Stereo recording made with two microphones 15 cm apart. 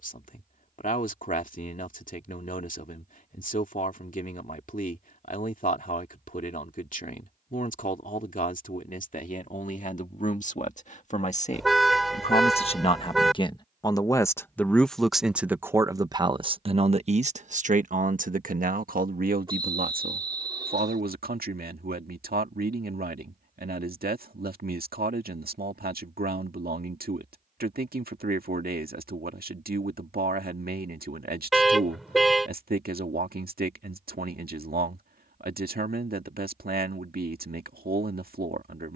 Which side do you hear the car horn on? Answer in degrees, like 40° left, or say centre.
centre.